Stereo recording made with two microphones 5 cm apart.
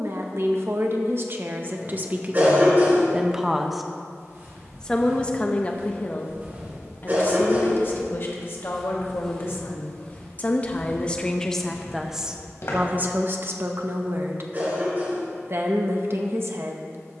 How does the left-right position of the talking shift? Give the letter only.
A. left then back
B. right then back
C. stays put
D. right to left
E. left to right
A.